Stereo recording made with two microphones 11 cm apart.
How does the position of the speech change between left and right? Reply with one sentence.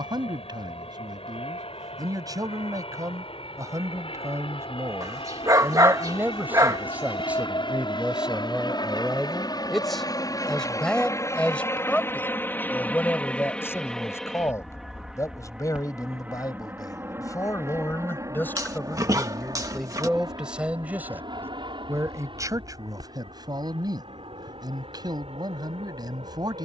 In this clip you hear the speech move from right to left and back again.